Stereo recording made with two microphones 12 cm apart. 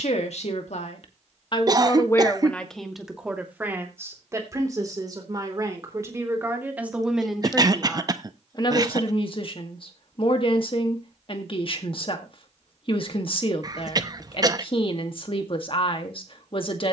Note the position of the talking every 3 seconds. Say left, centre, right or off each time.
left, right, centre, left, left, left.